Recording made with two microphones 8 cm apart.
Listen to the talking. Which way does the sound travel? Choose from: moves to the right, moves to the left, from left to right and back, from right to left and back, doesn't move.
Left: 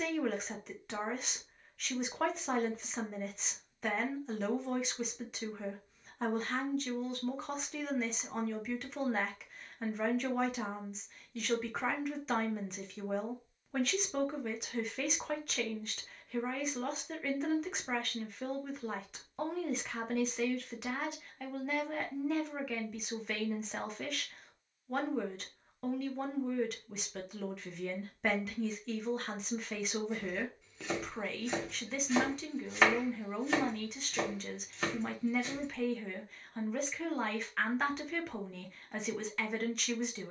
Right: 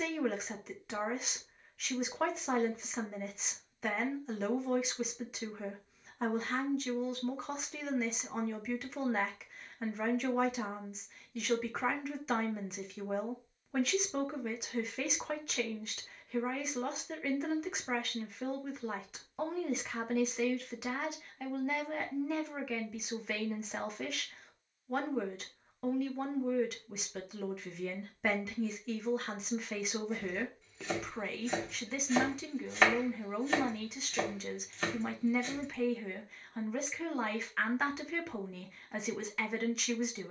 doesn't move.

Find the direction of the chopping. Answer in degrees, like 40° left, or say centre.
centre.